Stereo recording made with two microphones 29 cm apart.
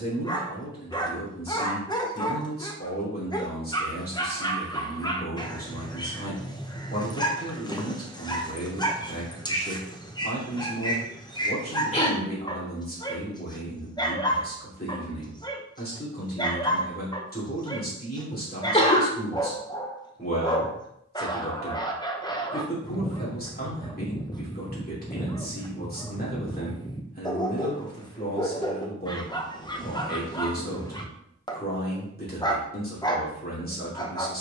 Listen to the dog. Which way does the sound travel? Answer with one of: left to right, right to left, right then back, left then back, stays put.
stays put.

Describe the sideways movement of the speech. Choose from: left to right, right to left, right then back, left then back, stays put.
stays put.